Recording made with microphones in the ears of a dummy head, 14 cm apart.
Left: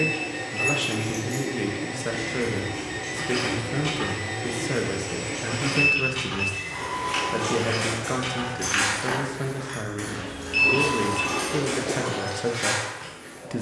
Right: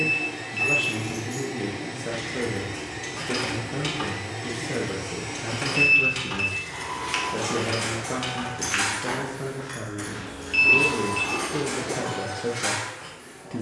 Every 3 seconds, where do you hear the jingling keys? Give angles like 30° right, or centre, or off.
centre, 50° right, 30° right, 10° left, 20° left.